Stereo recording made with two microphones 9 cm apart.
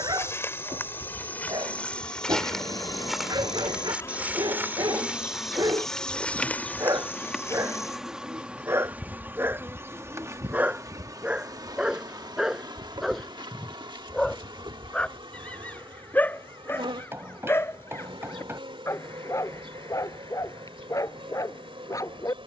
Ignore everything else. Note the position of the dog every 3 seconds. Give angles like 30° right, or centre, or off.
50° right, 50° right, 30° right, 20° right, centre, 20° left, 30° left, 40° left.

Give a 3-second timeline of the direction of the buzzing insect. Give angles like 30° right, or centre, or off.
50° left, 30° left, centre, 30° right, 60° right, 70° right, 80° right, 80° right.